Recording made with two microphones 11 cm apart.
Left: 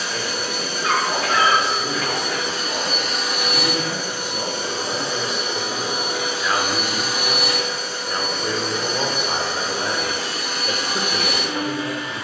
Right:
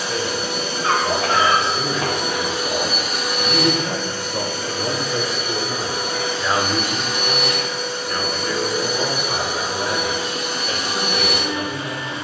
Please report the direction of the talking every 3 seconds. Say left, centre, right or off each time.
right, right, centre, left.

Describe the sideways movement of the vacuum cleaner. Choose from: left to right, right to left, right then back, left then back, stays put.
left then back.